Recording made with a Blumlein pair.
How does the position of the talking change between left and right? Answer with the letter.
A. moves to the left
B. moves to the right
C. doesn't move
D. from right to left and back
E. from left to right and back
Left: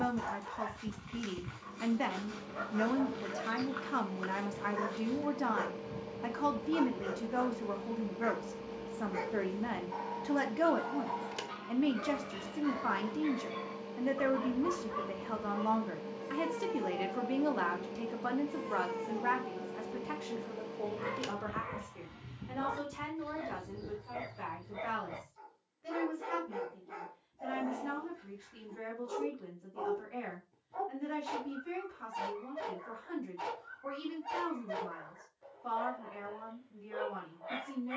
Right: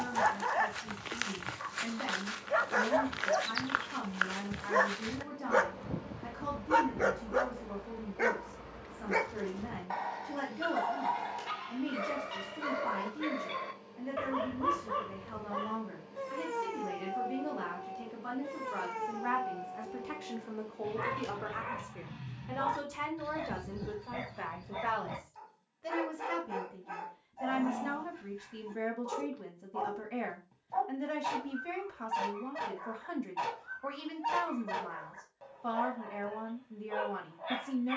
B.